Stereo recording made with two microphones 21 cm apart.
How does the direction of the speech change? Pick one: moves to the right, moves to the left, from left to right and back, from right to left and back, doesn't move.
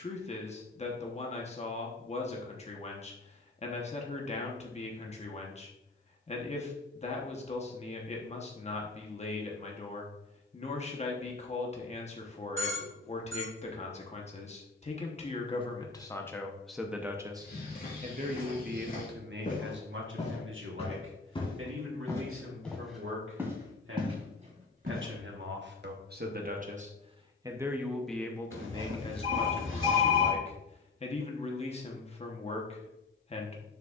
from left to right and back.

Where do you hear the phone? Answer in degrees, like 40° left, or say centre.
70° right.